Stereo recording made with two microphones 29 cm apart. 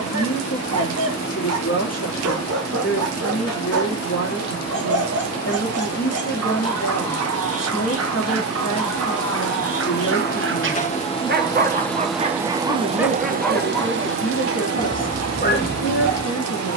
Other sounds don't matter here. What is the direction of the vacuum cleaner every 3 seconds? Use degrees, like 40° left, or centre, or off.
70° left, 60° left, 50° left, 30° left, 30° right, 70° right.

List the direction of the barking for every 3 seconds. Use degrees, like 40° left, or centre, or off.
60° right, 60° right, 60° right, 40° right, centre, 40° left.